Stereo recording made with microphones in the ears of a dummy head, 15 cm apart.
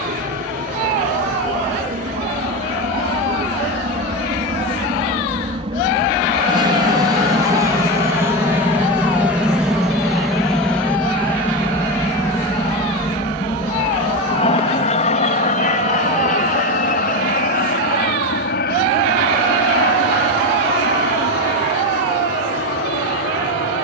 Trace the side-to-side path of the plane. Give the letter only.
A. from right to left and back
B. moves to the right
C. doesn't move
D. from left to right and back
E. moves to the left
E.